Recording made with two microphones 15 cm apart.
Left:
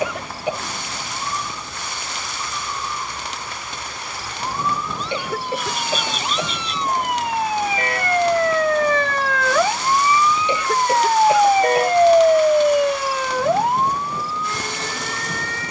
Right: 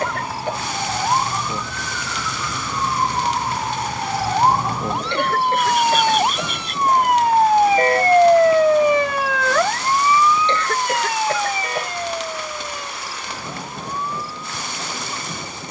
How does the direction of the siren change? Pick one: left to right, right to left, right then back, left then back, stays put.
right to left.